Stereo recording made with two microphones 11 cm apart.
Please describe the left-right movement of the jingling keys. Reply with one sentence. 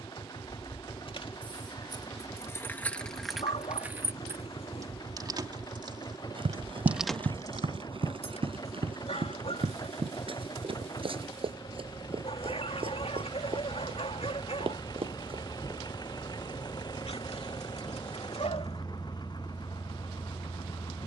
In this clip you hear the jingling keys go right and come back.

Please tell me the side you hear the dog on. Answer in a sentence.
In this clip you hear the dog on the left.